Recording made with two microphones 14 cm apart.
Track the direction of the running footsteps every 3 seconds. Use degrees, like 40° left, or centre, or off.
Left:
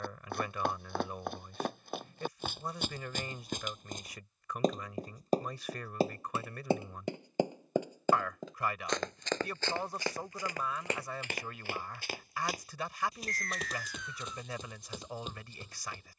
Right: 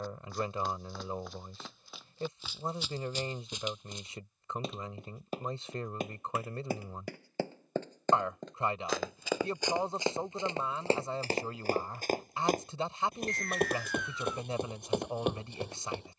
50° left, 40° left, 20° left, 20° right, 50° right, 60° right.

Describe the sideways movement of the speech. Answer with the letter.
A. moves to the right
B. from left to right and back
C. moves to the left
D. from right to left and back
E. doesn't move
E.